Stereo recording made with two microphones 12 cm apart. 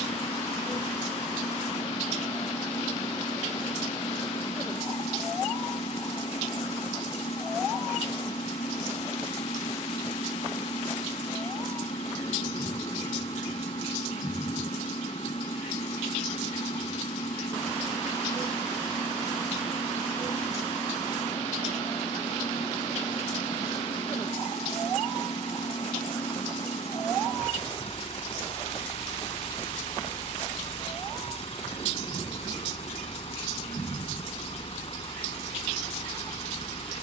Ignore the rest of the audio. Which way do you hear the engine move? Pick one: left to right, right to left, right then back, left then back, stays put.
stays put.